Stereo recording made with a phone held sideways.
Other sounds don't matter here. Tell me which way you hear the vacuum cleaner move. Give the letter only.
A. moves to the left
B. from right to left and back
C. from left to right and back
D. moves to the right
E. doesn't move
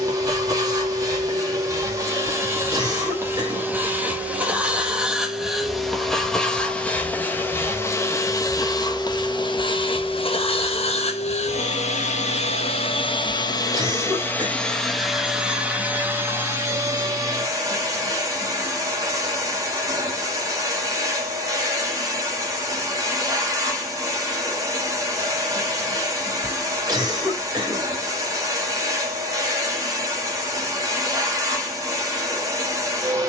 B.